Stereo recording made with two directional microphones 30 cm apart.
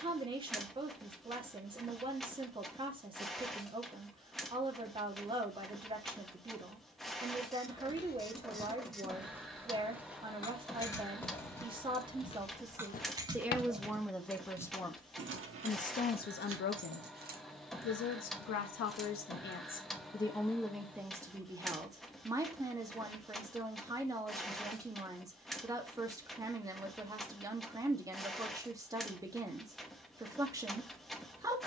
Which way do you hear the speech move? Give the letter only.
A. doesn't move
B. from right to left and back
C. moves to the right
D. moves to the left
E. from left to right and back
B.